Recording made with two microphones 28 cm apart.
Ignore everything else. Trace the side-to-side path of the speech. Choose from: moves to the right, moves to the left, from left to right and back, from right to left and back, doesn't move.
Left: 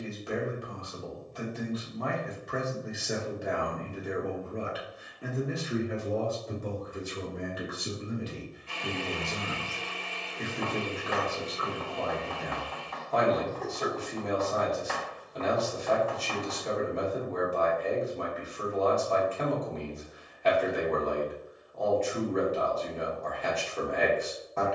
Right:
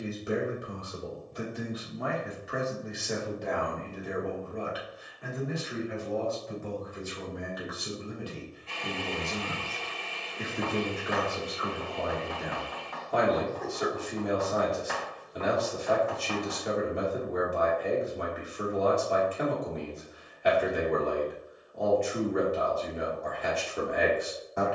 from right to left and back.